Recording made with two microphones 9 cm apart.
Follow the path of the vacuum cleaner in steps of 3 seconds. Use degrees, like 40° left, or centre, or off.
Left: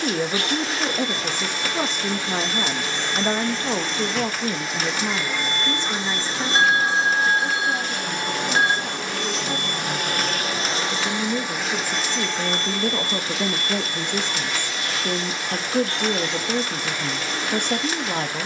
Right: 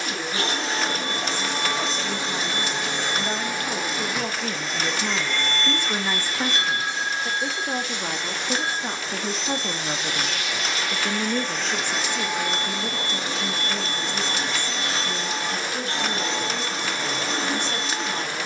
30° right, centre, 40° left, 40° left, 20° right, 30° right.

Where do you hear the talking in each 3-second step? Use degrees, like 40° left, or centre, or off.
60° left, 20° left, 30° right, 20° right, 40° left, 60° left.